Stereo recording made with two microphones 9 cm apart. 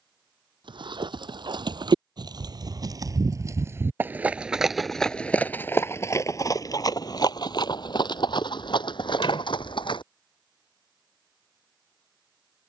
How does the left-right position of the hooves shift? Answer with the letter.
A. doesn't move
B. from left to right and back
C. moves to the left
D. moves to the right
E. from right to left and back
C.